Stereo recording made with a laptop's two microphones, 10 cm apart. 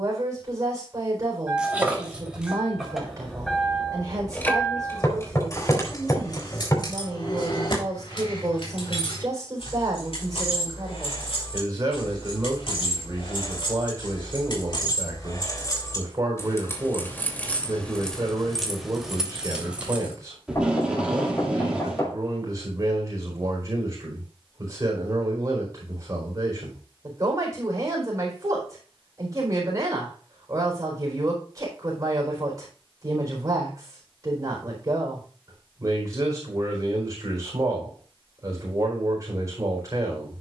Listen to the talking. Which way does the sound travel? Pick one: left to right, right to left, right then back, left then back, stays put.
stays put.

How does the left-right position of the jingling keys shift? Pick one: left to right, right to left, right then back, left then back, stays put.
left then back.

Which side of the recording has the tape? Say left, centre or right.
centre.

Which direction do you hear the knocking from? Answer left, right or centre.
left.